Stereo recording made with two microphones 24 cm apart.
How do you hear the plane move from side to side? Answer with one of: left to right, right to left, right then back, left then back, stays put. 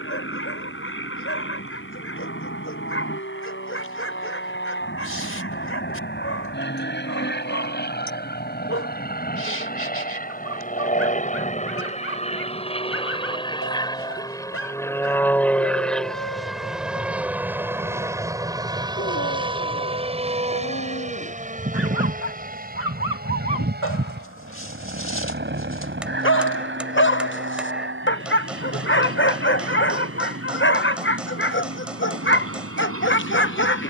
left to right.